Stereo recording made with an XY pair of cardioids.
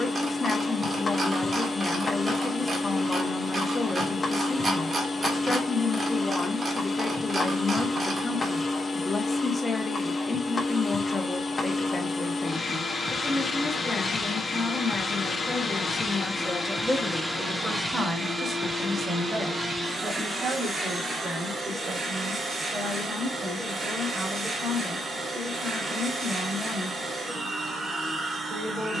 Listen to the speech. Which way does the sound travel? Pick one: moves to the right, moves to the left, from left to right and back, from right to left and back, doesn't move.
moves to the right.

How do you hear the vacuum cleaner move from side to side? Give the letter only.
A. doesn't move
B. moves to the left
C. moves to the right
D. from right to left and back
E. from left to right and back
C.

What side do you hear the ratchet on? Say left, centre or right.
right.